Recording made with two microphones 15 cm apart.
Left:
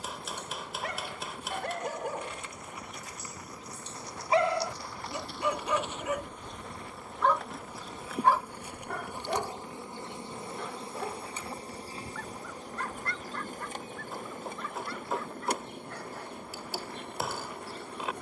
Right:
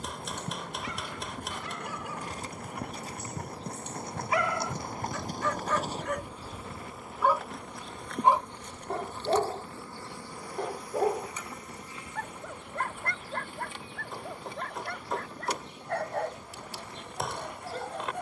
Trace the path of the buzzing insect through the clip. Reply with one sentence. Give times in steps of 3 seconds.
You can hear the buzzing insect on the right from 0 s, in the centre from 6 s and on the left from 9 s.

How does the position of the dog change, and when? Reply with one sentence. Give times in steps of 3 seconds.
In this clip you hear the dog on the left from 0 s, in the centre from 6 s and on the right from 9 s.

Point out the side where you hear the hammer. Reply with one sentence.
In this clip you hear the hammer in the centre.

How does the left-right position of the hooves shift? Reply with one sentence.
You can hear the hooves move to the left.